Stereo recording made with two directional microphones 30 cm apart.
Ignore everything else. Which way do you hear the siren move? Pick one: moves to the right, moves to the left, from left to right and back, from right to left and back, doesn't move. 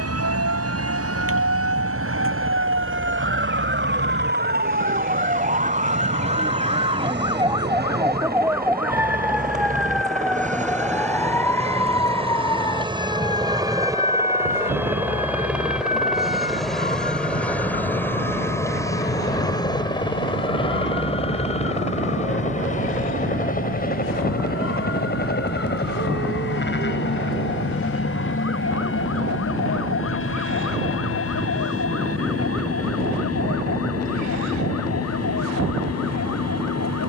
moves to the left.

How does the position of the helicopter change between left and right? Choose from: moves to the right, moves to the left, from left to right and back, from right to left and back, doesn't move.
moves to the left.